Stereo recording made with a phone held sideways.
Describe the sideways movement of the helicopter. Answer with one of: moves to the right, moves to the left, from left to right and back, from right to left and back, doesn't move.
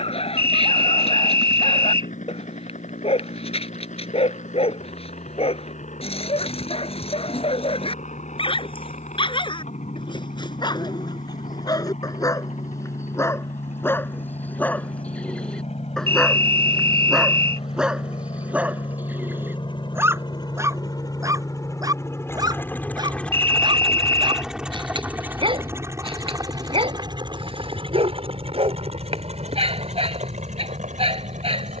moves to the right.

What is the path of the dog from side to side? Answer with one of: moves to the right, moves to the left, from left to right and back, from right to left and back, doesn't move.
moves to the right.